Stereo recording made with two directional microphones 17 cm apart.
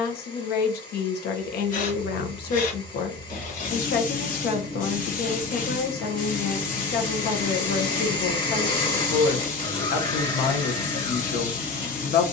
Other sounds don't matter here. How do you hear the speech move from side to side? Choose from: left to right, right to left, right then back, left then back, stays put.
stays put.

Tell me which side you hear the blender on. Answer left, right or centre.
left.